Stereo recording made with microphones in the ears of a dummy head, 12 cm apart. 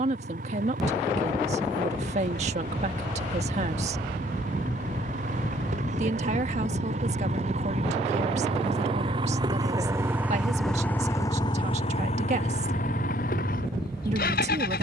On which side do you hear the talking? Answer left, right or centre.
right.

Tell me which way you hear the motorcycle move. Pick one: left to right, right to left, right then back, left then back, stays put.
right to left.